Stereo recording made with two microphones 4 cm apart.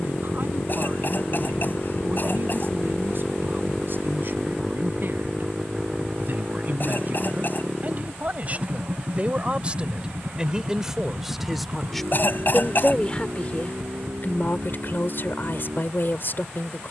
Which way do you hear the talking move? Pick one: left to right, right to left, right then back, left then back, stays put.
right to left.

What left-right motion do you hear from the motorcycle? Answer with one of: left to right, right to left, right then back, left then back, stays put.
left to right.